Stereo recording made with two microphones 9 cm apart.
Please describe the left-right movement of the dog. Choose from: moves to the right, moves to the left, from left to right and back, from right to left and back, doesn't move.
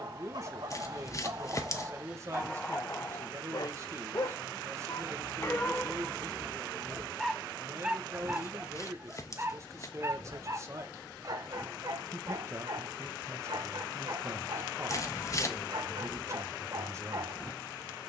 from right to left and back.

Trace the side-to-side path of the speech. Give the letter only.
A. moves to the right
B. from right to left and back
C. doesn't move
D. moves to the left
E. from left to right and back
C.